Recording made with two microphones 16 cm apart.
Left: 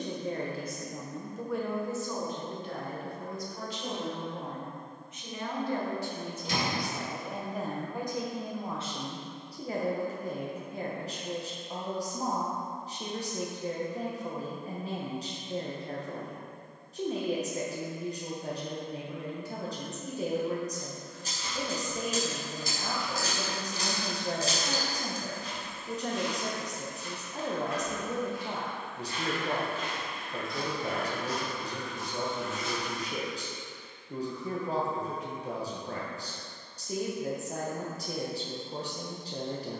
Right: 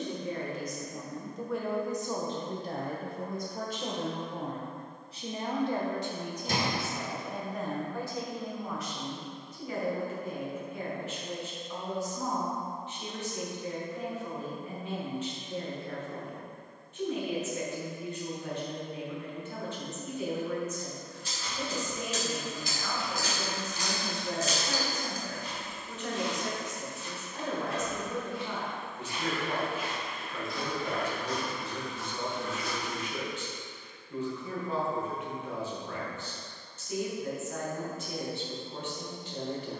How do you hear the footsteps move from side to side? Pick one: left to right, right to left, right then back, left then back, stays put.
right then back.